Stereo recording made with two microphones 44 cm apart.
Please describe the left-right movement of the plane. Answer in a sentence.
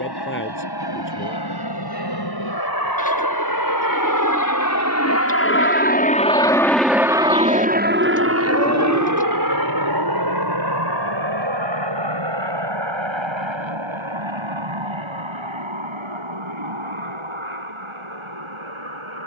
In this clip you hear the plane travel towards the right.